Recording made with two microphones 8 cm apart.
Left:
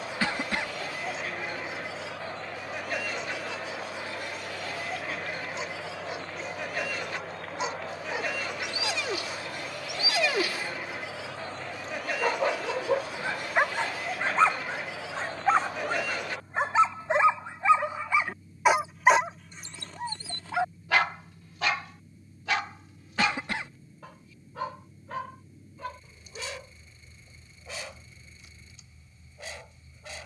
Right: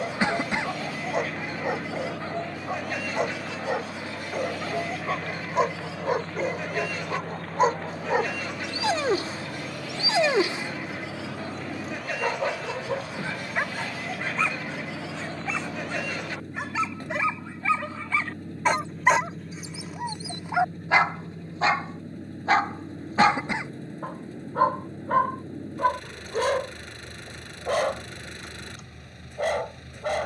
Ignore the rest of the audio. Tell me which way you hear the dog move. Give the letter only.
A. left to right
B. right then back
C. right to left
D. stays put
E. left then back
E.